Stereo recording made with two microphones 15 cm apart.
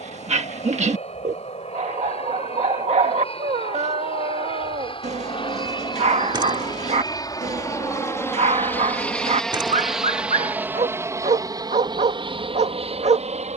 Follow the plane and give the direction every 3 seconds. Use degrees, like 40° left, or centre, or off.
50° left, 40° left, 20° left, 10° right, 40° right.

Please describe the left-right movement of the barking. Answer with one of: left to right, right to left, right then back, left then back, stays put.
stays put.